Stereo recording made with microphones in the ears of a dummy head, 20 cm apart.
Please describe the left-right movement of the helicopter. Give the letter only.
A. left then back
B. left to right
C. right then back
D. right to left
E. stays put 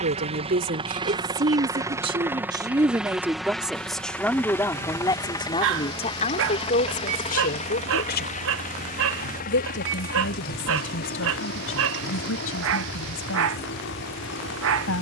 D.